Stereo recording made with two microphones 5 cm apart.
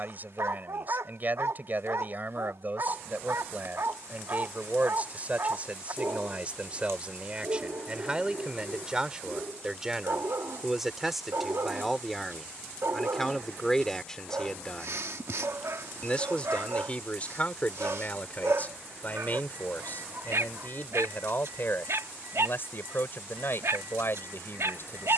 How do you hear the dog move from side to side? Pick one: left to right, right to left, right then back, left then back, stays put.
stays put.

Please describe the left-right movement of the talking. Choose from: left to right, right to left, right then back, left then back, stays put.
right to left.